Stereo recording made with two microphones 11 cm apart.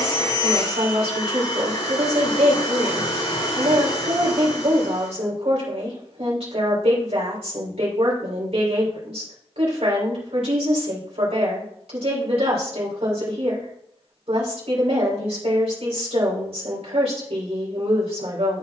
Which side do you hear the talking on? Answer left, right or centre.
right.